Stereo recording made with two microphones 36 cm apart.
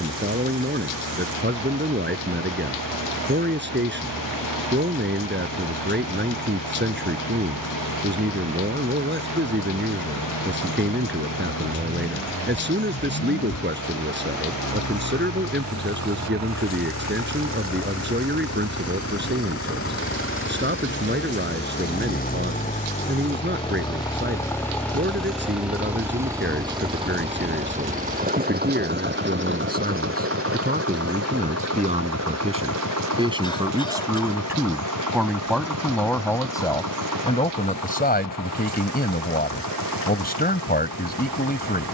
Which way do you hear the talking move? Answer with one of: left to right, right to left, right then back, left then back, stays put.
right to left.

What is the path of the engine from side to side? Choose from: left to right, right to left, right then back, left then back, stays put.
left to right.